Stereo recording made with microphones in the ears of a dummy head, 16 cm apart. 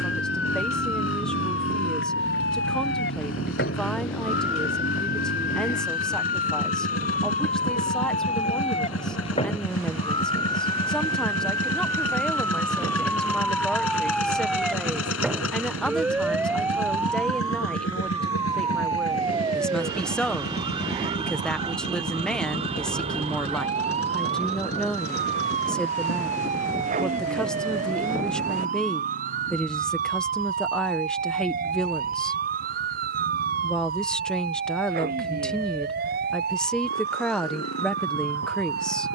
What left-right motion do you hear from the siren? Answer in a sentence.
In this clip you hear the siren travel towards the right.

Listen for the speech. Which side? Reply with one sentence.
In this clip you hear the speech in the centre.